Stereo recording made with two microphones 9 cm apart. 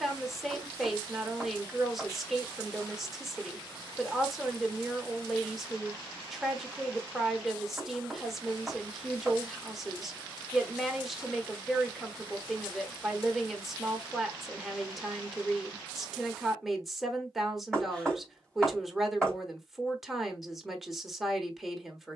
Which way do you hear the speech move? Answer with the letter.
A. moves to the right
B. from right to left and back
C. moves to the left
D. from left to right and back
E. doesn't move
E.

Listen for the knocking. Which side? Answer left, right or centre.
centre.